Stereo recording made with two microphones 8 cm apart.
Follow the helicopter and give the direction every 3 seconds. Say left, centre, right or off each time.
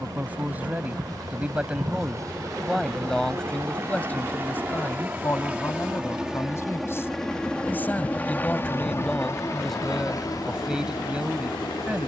right, right, centre, left.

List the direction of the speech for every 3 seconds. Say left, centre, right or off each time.
centre, left, left, centre.